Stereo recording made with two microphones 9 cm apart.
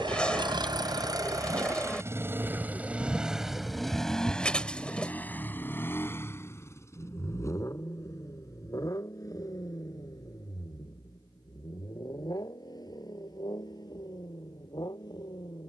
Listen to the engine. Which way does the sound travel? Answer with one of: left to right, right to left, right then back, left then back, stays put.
right to left.